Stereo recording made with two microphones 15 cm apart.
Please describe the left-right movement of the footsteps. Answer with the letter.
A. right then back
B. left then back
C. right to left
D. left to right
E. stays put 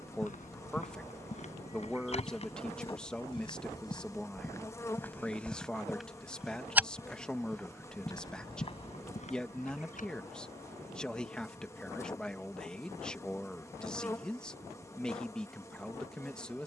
A.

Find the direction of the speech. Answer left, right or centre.
centre.